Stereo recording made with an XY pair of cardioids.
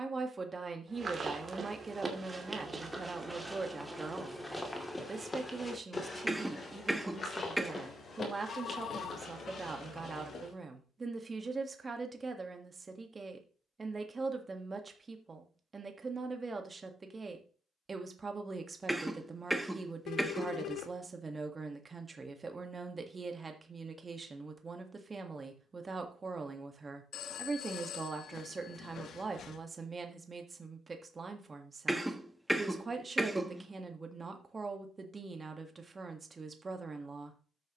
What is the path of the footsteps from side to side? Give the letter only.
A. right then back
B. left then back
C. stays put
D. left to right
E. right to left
E.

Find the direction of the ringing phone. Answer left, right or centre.
left.